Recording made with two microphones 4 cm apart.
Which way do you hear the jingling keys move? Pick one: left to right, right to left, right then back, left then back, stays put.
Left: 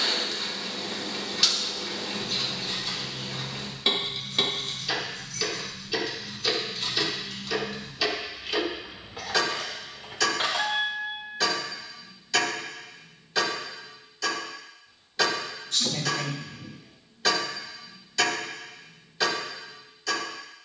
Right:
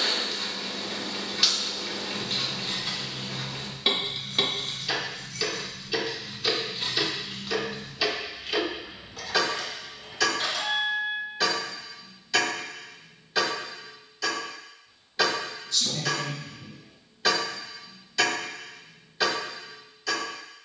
right to left.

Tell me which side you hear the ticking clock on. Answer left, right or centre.
centre.